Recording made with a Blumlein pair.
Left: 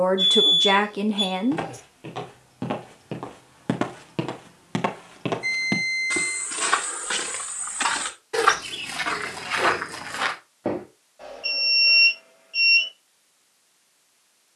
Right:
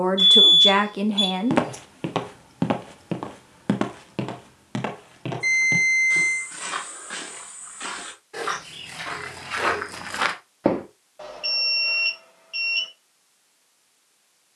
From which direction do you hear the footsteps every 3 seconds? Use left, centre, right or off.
right, centre, left, centre, off.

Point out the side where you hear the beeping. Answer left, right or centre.
right.